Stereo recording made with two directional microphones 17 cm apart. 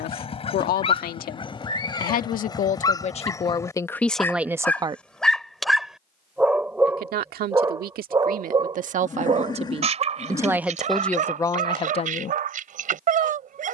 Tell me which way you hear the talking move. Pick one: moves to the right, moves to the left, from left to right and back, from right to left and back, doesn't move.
from left to right and back.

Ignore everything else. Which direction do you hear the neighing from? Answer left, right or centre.
left.